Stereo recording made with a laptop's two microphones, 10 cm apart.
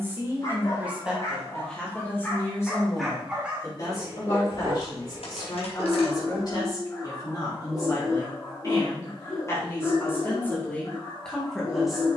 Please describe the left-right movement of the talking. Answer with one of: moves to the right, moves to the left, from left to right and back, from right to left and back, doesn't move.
from right to left and back.